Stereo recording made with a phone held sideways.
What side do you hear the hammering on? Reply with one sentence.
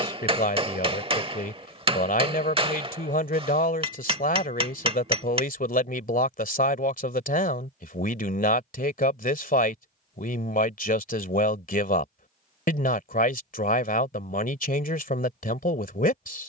You can hear the hammering on the right.